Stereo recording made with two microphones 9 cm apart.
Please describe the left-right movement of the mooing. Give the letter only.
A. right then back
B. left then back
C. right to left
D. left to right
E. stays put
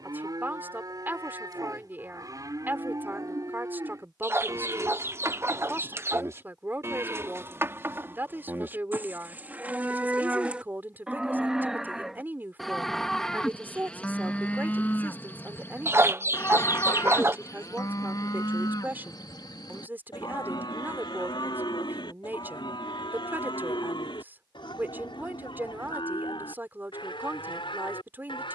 C.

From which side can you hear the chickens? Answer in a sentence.
You can hear the chickens on the right.